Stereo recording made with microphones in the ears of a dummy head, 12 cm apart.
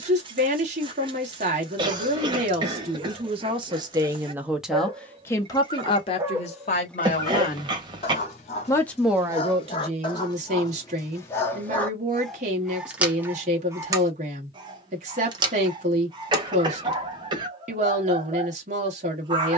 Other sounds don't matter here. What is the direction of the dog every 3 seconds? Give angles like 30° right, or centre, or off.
40° right, 40° right, 20° left, 30° left, 10° right, 30° right, 30° right.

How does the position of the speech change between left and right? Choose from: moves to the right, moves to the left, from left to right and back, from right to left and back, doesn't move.
from right to left and back.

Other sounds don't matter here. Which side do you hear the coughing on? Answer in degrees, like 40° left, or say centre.
30° right.